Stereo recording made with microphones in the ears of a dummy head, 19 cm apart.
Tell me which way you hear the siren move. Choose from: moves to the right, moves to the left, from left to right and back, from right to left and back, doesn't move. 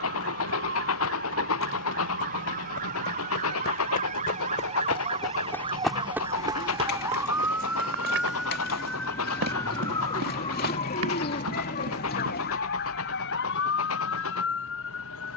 moves to the left.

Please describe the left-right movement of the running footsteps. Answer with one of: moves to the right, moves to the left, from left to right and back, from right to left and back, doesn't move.
moves to the right.